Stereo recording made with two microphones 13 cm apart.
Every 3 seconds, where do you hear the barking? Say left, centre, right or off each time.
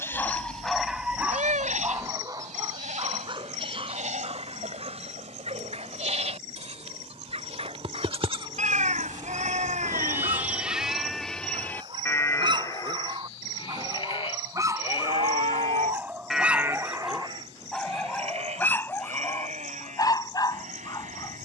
centre, right, right, right, right, centre, left.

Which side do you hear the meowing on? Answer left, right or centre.
right.